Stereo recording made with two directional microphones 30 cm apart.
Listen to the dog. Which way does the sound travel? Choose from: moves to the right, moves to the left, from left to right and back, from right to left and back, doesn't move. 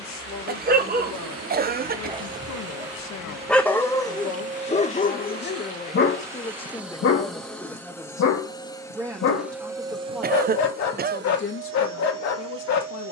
moves to the left.